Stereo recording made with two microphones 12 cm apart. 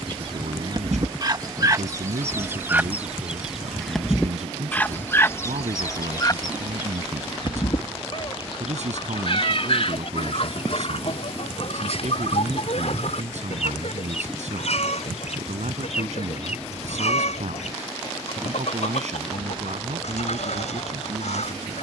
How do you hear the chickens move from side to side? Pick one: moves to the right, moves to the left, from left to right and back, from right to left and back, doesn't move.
moves to the left.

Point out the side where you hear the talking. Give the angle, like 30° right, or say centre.
80° right.